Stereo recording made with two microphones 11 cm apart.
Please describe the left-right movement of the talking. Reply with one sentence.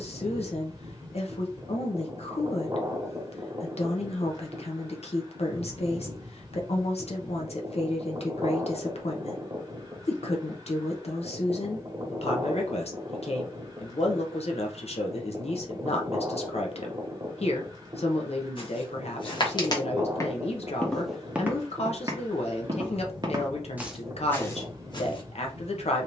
You can hear the talking stay put.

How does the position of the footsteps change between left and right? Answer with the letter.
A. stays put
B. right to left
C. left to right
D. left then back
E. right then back
E.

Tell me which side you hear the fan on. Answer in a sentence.
In this clip you hear the fan on the right.